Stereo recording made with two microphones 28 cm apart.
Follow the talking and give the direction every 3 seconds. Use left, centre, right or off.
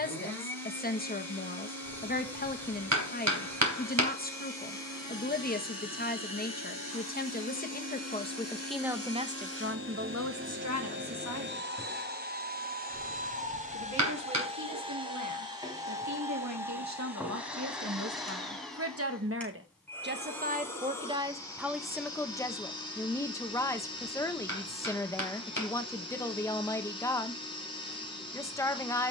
left, left, left, right, right, right, right, centre, centre, centre.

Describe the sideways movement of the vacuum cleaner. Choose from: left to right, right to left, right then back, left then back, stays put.
right to left.